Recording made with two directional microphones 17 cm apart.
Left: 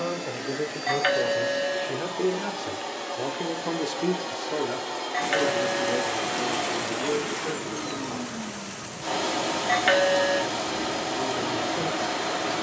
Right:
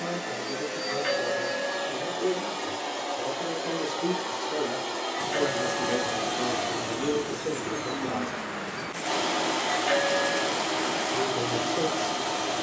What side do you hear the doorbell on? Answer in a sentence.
You can hear the doorbell on the left.